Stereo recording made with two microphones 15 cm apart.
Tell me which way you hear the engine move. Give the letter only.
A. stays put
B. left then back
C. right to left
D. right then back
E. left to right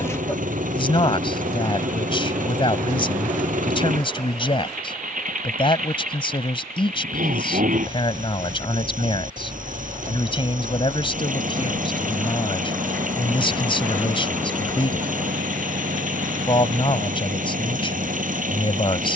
A.